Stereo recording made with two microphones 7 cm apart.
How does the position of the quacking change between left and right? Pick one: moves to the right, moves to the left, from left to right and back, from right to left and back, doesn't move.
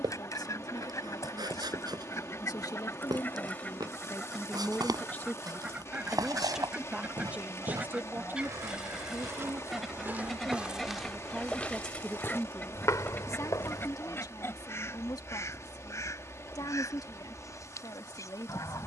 from left to right and back.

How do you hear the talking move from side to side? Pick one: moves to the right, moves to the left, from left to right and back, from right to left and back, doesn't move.
from left to right and back.